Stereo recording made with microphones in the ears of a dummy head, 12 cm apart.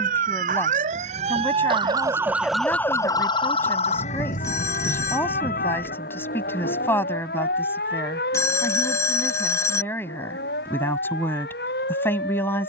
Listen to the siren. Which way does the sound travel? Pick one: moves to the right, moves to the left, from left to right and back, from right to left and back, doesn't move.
moves to the left.